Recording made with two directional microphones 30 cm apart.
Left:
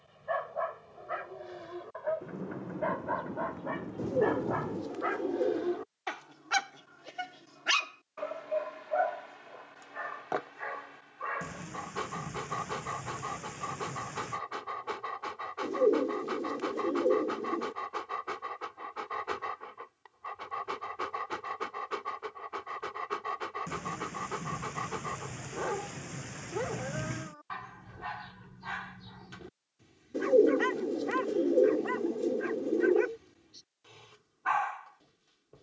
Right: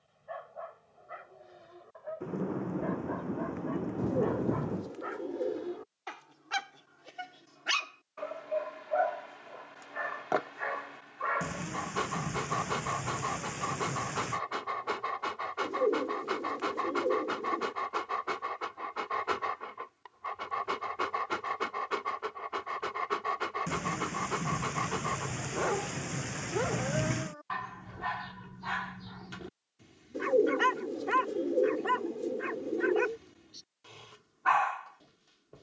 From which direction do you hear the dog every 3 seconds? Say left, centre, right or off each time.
left, left, centre, right, right, right, right, right, right, right, right, right.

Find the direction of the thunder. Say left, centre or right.
right.